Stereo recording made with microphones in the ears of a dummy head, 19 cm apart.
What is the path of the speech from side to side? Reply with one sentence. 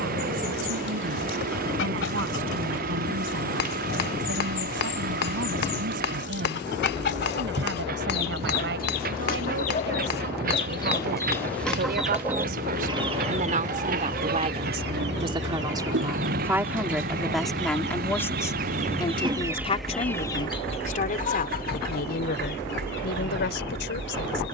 You can hear the speech move from right to left.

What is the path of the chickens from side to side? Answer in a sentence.
In this clip you hear the chickens go right and come back.